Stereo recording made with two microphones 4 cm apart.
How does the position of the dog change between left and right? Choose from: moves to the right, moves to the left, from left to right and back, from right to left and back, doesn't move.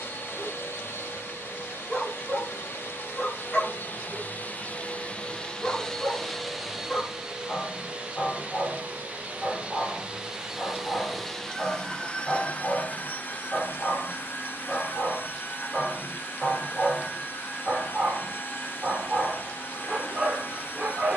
moves to the right.